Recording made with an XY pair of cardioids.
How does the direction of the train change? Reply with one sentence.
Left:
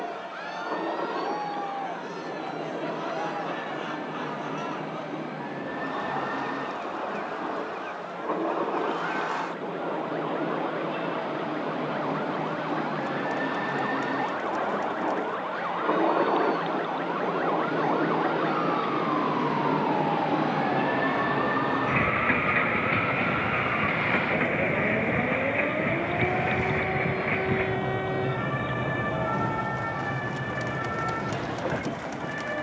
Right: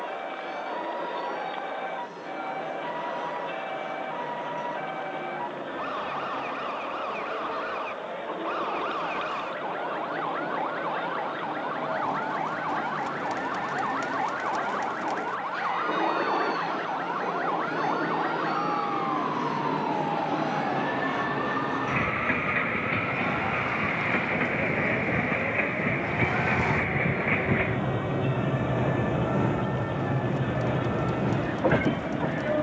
You can hear the train move from left to right.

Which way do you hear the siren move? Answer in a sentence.
In this clip you hear the siren go from the right side to the left.